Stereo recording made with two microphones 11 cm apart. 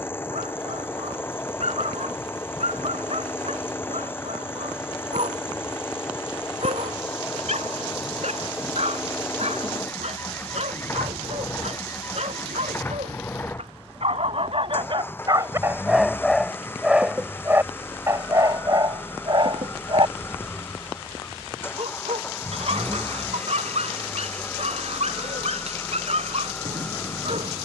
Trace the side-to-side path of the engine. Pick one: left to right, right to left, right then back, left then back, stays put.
stays put.